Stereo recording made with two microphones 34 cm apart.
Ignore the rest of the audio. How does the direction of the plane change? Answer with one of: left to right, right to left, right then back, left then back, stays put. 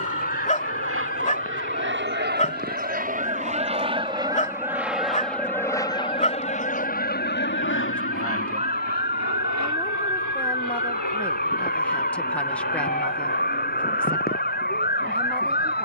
right to left.